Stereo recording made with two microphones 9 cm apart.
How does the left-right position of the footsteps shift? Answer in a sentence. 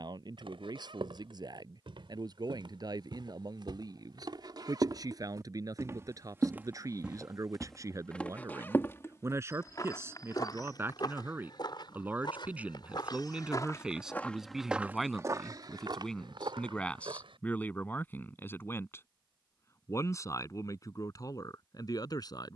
In this clip you hear the footsteps move from right to left and back again.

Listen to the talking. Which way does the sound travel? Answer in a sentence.
You can hear the talking move to the left.